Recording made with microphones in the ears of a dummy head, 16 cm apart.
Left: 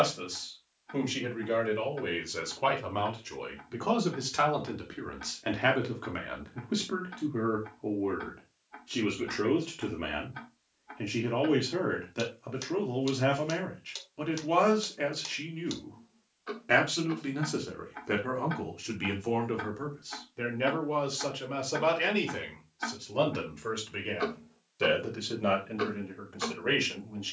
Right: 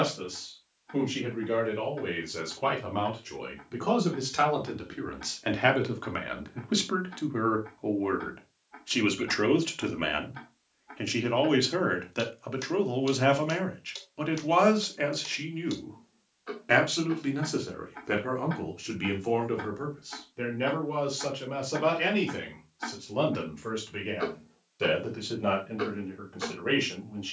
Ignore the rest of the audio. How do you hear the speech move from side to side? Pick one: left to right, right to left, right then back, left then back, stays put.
right then back.